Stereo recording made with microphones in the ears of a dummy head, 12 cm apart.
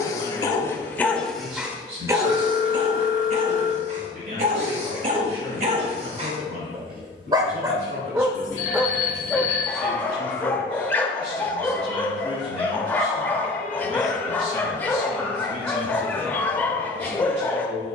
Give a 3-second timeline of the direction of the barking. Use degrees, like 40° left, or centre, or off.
centre, 50° right, 30° right, 10° left, 10° left, 10° left.